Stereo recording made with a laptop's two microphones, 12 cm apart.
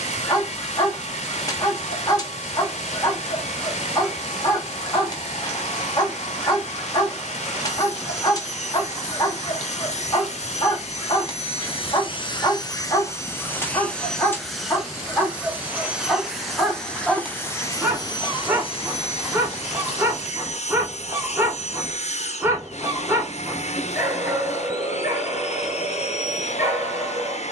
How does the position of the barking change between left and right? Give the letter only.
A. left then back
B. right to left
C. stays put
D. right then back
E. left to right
E.